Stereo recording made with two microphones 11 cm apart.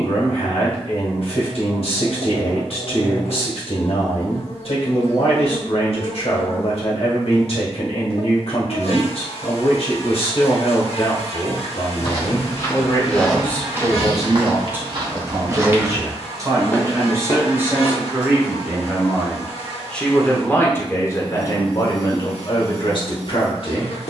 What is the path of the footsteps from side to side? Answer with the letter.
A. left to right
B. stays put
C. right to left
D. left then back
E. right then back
E.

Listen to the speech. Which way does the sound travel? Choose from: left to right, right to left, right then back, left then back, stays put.
right then back.